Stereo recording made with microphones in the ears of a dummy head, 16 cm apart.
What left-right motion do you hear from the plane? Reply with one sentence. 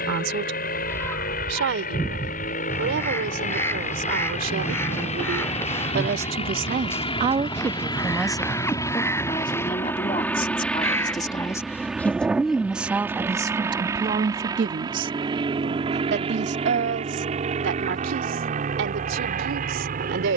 In this clip you hear the plane go from the left side to the right.